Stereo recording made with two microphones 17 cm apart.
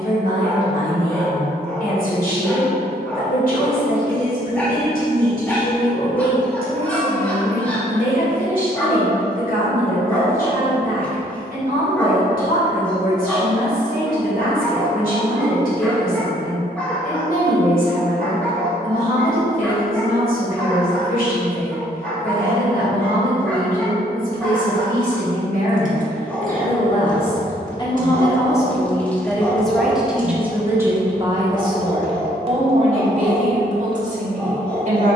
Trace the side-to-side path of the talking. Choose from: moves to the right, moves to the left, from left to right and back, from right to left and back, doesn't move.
moves to the right.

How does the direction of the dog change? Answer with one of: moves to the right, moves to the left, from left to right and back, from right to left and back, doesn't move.
doesn't move.